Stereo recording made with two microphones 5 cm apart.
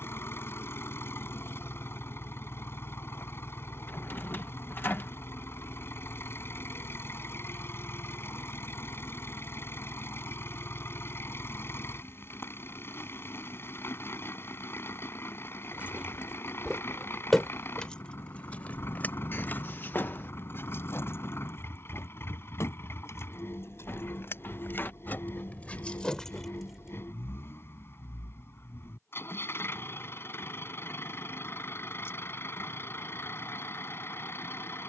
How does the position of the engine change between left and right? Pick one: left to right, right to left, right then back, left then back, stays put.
stays put.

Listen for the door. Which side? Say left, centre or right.
left.